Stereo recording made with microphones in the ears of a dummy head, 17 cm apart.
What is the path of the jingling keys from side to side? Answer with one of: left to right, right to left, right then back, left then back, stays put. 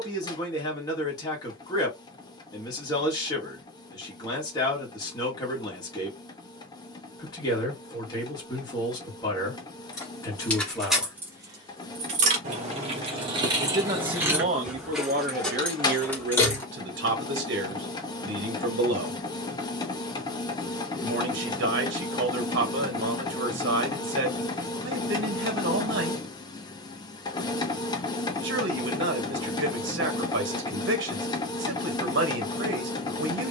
right then back.